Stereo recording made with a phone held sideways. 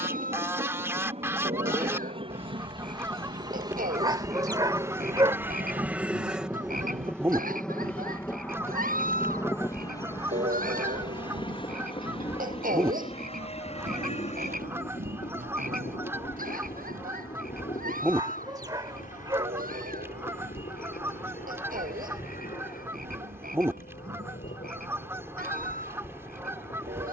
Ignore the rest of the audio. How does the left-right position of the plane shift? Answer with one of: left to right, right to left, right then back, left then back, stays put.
right to left.